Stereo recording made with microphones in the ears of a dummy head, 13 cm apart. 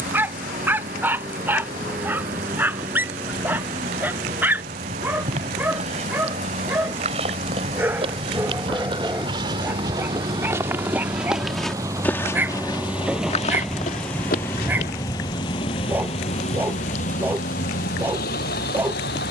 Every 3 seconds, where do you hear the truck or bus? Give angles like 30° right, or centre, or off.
60° right, 50° right, 50° right, 30° right, centre, 40° left, 70° left.